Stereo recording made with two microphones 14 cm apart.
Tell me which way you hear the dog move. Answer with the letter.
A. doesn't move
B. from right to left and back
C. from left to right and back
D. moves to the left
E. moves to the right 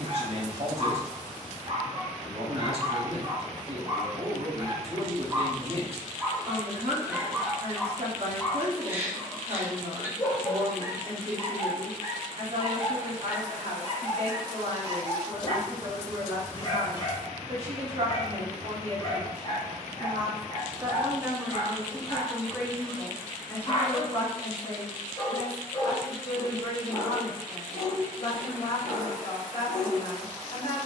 D.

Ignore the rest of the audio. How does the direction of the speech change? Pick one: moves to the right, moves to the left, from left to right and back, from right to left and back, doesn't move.
moves to the left.